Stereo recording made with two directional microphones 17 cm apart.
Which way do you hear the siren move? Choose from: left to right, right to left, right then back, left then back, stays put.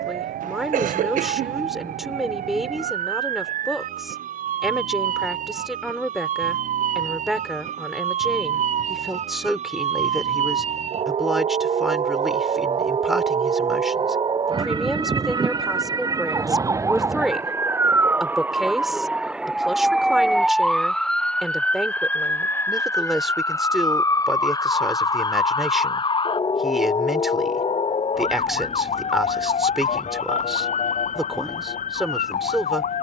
right to left.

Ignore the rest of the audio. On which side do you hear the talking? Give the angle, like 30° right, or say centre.
centre.